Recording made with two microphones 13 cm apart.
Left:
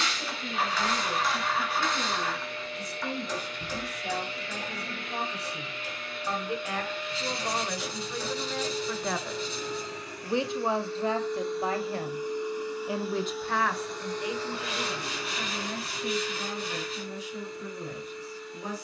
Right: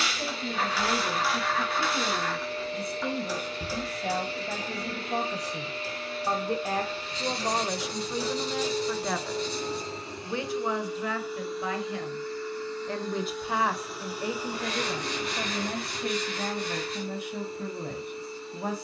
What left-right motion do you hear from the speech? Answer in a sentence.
In this clip you hear the speech move from right to left and back again.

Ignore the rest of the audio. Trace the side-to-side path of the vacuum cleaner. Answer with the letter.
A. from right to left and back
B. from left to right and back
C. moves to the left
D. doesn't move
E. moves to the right
A.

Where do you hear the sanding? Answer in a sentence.
You can hear the sanding in the centre.